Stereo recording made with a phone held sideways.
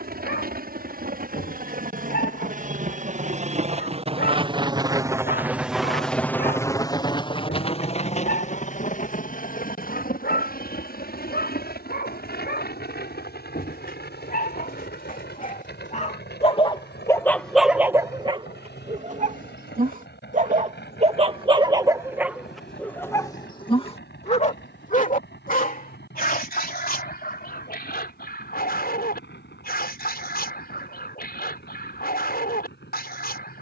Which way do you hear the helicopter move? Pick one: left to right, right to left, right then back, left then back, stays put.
right to left.